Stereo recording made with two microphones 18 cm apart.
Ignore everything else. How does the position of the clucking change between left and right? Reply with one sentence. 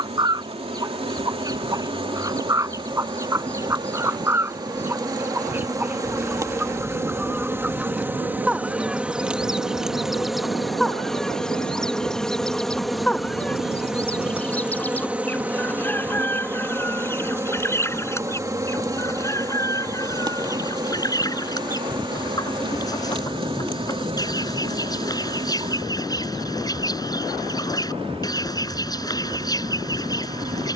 You can hear the clucking move from right to left.